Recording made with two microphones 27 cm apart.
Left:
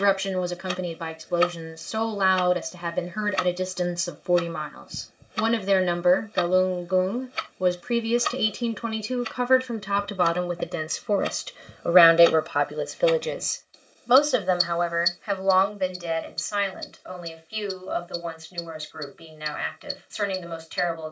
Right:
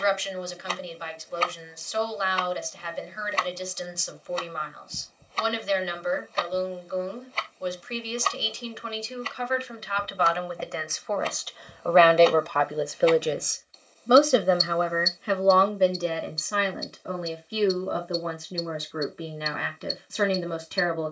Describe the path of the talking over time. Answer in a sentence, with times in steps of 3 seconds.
You can hear the talking on the left from 0 s, in the centre from 12 s and on the right from 15 s.